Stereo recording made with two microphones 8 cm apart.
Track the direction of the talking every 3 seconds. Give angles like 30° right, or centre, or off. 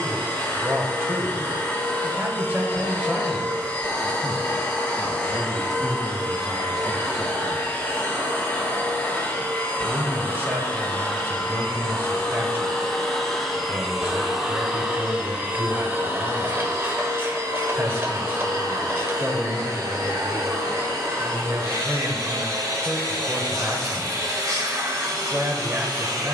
30° right, centre, centre, 30° right, 30° right, 30° right, 30° right, 30° right, 30° right.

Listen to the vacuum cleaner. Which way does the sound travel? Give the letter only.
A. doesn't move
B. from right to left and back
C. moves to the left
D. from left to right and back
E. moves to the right
E.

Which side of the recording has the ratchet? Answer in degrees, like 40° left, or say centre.
30° right.